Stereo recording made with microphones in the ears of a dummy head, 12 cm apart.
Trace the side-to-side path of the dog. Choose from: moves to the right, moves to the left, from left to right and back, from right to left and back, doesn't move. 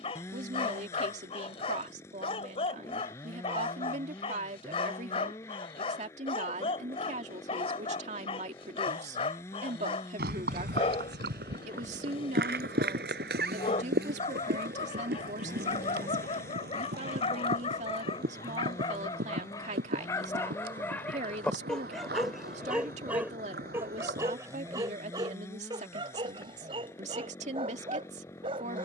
moves to the right.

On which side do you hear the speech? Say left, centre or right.
right.